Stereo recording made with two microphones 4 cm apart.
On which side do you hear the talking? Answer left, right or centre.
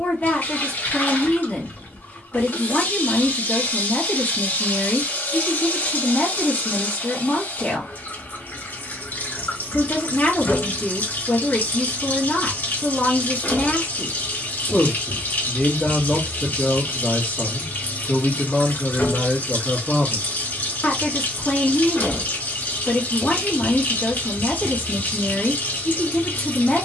left.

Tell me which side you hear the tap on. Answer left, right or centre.
left.